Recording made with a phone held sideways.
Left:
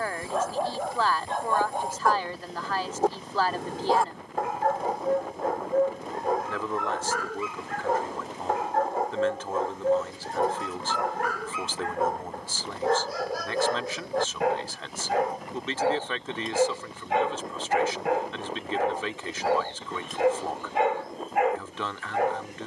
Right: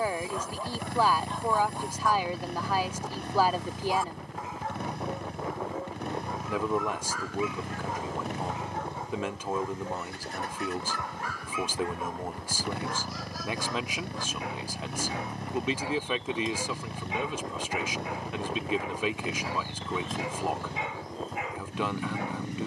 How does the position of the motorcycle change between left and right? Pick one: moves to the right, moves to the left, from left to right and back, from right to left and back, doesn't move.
doesn't move.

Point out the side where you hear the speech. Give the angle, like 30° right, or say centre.
10° right.